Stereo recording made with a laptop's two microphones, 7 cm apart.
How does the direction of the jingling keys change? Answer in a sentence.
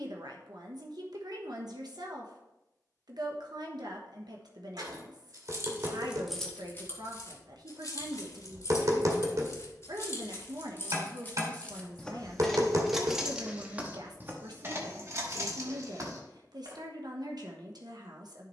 You can hear the jingling keys go left and come back.